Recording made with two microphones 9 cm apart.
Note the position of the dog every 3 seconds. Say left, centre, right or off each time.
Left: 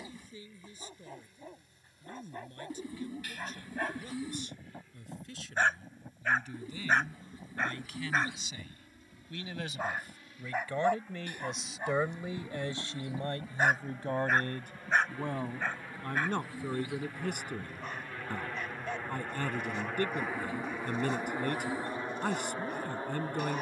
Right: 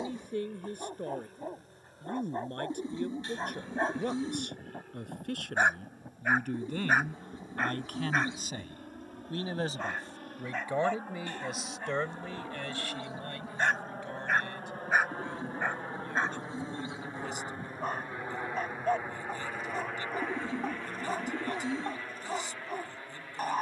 right, right, centre, centre, centre, right, right, right.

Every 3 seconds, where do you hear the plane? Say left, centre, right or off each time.
right, right, right, right, right, right, centre, left.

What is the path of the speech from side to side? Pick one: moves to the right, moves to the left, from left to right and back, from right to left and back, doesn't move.
moves to the left.